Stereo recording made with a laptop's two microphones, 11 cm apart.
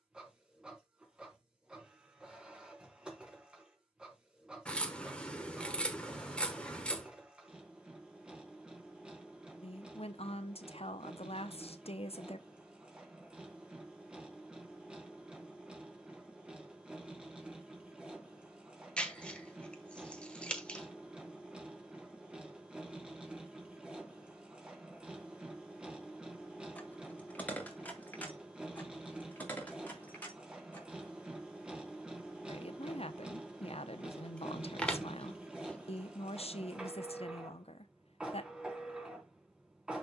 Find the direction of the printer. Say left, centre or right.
centre.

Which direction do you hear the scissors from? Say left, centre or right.
centre.